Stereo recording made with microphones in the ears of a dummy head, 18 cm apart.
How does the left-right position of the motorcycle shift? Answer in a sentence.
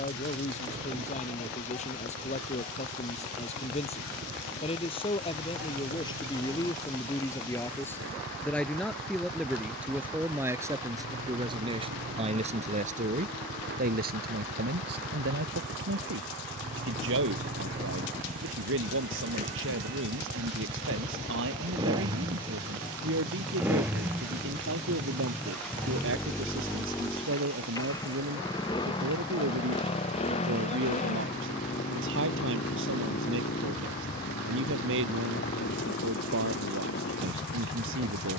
You can hear the motorcycle move to the left.